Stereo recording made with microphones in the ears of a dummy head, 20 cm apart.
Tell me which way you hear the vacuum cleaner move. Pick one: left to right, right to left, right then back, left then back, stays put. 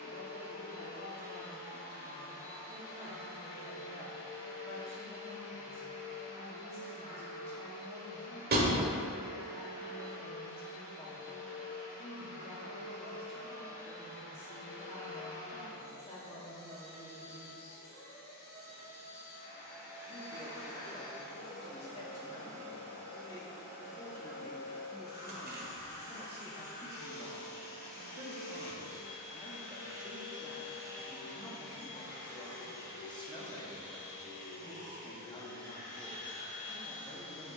stays put.